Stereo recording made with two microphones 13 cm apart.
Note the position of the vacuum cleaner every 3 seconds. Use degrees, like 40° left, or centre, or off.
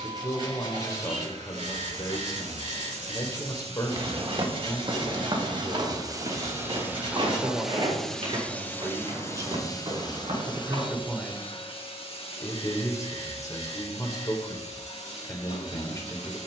60° right, 50° right, 10° right, 30° left, 50° left, 60° left.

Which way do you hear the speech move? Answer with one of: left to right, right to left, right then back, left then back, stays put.
right then back.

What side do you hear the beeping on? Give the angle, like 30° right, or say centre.
50° right.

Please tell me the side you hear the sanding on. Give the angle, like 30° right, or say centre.
40° right.